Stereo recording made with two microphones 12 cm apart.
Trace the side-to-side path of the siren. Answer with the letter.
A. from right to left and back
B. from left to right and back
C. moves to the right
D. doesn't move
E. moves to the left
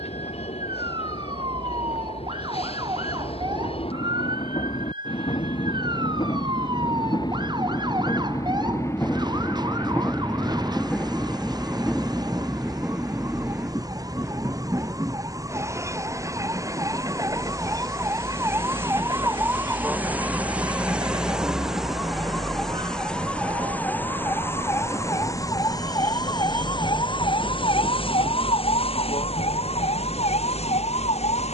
E.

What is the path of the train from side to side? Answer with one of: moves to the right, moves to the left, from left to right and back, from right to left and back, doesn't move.
moves to the right.